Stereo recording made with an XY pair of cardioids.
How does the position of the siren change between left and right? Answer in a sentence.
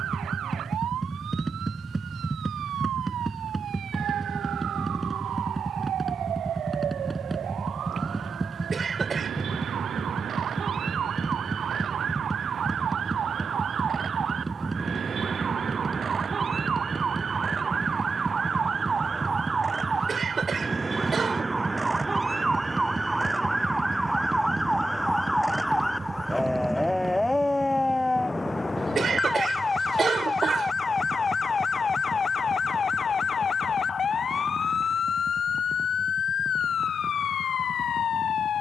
In this clip you hear the siren move to the left.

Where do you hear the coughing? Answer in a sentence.
You can hear the coughing on the right.